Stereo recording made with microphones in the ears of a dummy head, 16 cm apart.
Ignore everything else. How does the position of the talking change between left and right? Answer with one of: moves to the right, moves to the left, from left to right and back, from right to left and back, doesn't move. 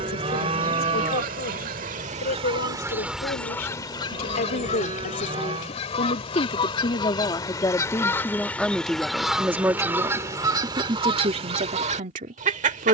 moves to the right.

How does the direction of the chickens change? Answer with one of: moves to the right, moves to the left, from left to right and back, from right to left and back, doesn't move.
from right to left and back.